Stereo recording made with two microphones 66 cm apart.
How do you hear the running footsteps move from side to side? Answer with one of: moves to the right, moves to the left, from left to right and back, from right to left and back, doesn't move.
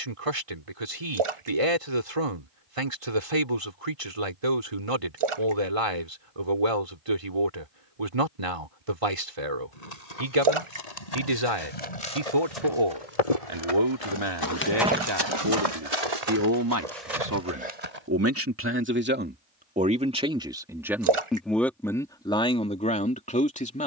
moves to the right.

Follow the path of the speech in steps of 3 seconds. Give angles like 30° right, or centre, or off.
50° right, 50° right, 50° right, 50° right, 50° right, 30° right, 10° right, 10° left.